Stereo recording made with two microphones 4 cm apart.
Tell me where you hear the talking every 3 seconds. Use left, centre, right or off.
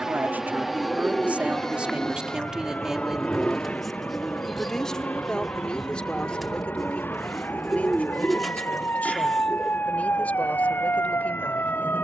right, centre, left, left.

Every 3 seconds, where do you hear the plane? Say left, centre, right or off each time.
centre, left, left, left.